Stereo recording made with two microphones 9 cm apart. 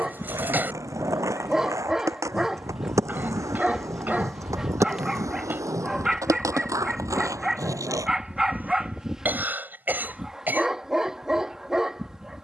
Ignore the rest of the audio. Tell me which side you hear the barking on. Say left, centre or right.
centre.